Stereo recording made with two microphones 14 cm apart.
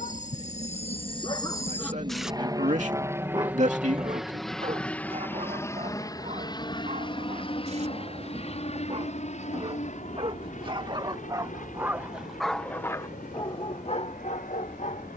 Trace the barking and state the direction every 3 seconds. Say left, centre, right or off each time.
left, right, right, right, left.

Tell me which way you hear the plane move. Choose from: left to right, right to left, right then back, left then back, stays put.
right to left.